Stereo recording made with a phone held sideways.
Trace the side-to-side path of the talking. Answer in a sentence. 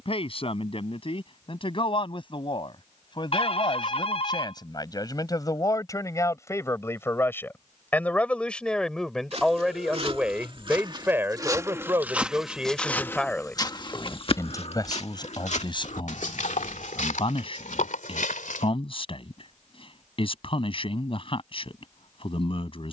You can hear the talking go right and come back.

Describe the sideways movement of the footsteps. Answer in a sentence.
In this clip you hear the footsteps go from the right side to the left.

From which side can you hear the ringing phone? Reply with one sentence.
You can hear the ringing phone on the left.